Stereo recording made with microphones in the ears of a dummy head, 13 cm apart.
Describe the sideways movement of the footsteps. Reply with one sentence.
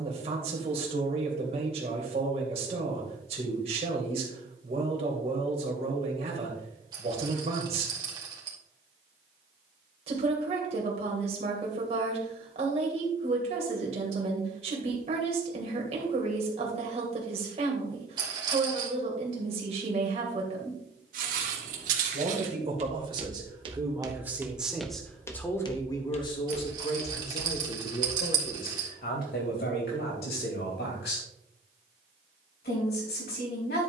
In this clip you hear the footsteps move from right to left.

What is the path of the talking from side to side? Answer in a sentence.
In this clip you hear the talking move to the left.